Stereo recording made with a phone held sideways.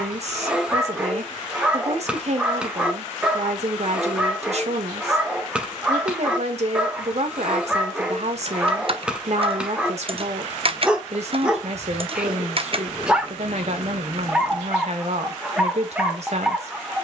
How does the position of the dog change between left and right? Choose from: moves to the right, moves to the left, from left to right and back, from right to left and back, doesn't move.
doesn't move.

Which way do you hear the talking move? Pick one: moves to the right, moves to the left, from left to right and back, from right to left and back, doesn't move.
doesn't move.